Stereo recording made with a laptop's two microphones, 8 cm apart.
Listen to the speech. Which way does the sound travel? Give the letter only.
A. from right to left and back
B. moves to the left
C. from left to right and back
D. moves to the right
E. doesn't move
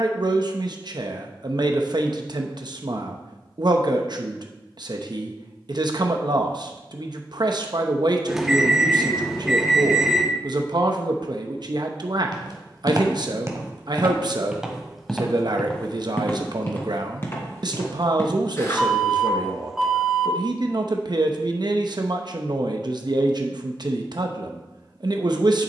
E.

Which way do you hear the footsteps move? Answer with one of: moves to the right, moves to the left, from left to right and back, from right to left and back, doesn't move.
moves to the left.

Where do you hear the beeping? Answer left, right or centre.
centre.